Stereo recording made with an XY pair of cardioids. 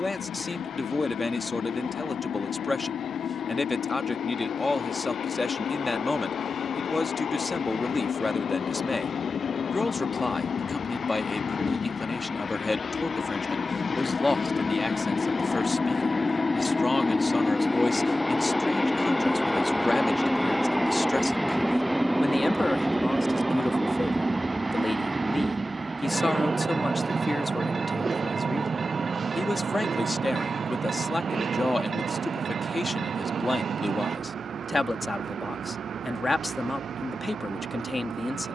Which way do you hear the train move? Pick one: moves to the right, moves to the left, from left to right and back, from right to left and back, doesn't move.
moves to the right.